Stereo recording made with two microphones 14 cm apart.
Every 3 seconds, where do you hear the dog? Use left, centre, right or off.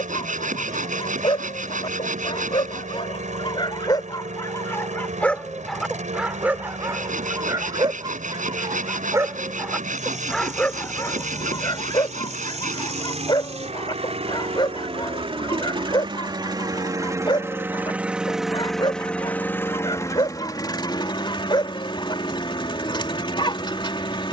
left, left, right, centre, left, left, left, left.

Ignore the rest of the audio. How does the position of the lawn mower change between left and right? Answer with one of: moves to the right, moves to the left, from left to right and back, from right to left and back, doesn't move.
moves to the left.